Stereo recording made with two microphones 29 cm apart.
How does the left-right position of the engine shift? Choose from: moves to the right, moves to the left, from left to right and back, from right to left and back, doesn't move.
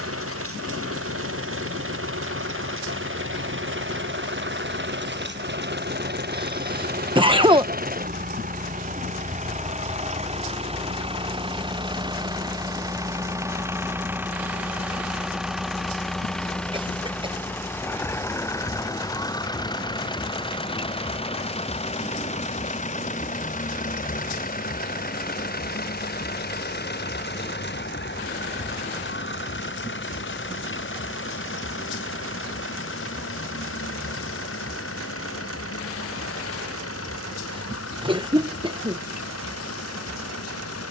moves to the left.